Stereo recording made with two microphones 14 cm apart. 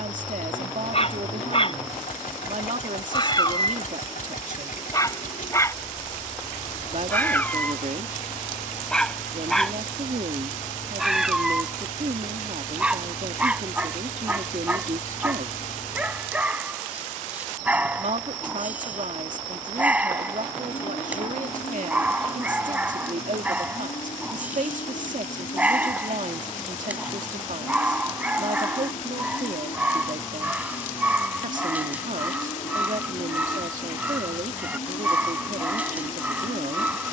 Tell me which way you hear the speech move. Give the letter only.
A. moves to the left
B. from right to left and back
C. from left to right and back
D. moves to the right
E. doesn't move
E.